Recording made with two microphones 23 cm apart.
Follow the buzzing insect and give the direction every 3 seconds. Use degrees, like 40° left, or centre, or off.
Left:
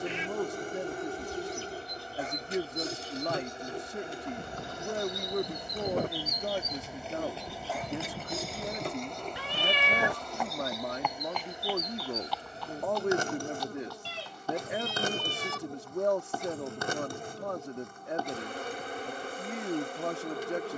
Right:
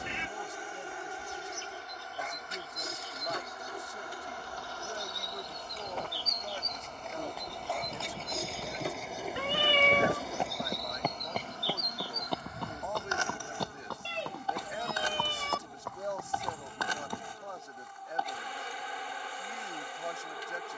40° left, 20° left, 10° left, centre, 40° left, 50° left, 50° left.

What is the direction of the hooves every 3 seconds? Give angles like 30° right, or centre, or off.
off, 50° left, 20° left, 30° right, 60° right, 70° right, off.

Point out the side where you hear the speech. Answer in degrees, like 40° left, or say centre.
70° left.